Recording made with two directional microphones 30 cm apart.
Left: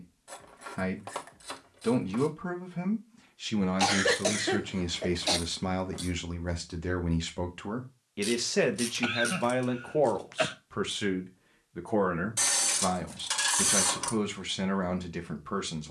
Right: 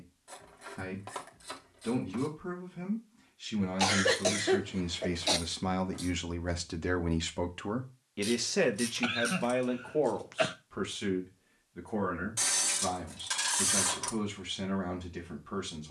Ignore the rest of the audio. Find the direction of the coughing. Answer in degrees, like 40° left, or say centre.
10° left.